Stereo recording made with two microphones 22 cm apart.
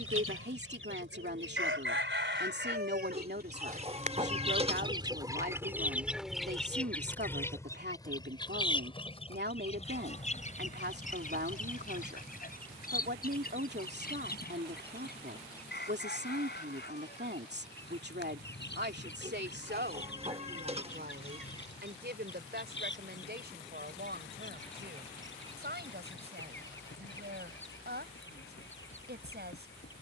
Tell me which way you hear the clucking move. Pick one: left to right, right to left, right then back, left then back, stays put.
right to left.